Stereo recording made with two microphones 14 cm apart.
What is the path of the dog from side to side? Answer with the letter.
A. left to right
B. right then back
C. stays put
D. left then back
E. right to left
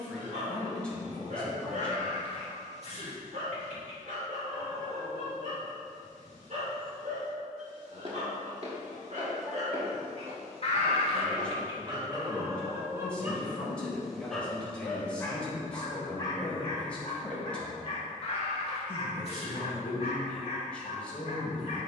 E.